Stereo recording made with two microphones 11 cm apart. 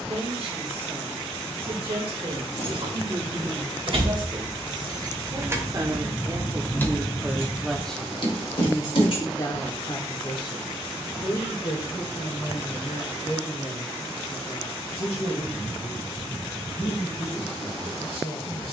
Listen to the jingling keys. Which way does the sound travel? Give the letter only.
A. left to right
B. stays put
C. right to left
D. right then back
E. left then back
C.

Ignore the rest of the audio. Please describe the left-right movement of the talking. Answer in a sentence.
You can hear the talking go from the right side to the left.